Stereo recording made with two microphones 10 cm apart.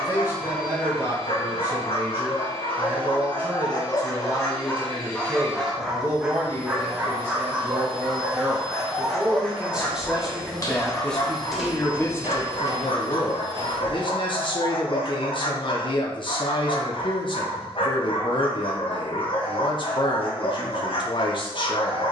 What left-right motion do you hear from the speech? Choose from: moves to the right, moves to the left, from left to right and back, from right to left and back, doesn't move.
moves to the left.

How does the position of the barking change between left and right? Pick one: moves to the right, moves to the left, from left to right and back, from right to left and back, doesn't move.
from left to right and back.